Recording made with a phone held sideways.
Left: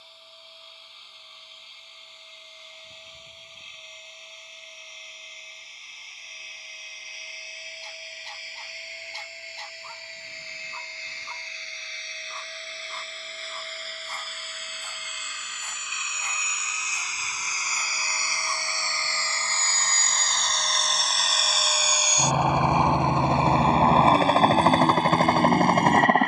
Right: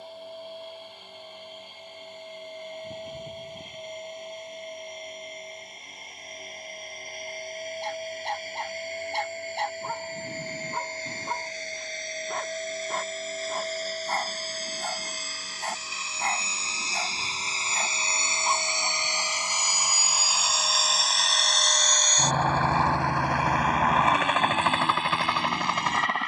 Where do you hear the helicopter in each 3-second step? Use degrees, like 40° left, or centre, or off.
60° right, 60° right, 50° right, 50° right, 40° right, 30° right, 10° right, 10° left, 40° left.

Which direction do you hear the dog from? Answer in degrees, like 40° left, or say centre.
60° right.